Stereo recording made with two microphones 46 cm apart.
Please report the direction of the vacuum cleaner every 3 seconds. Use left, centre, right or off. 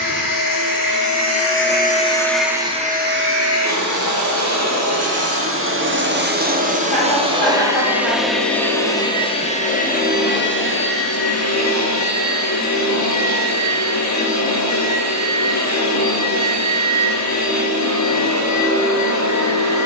left, right, centre, left, left, left, left.